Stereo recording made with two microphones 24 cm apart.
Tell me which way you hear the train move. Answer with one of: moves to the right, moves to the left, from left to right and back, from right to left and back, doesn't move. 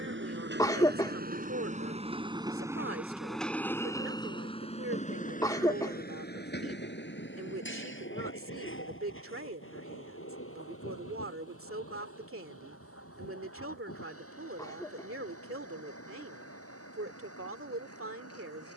moves to the left.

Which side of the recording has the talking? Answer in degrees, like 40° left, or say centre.
60° right.